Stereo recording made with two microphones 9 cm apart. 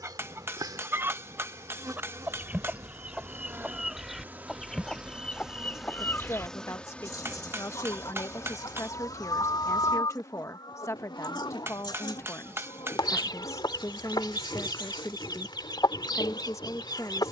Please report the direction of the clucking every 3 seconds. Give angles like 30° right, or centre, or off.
20° right, centre, 40° left, 50° left, 50° left, 50° left.